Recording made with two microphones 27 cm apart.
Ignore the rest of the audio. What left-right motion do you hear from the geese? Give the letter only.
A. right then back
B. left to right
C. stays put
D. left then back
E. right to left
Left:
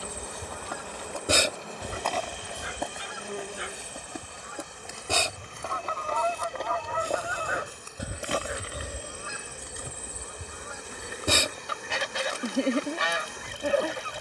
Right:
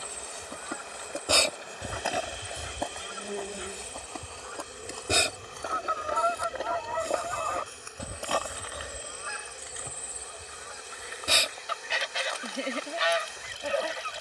A.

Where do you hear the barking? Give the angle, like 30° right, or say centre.
80° left.